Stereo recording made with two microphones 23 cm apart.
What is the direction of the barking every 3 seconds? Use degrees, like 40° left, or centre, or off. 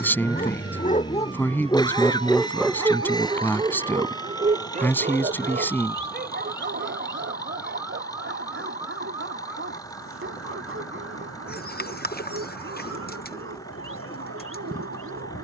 20° left, 30° right, 50° right, 60° right, 70° right.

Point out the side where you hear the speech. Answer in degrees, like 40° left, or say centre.
10° left.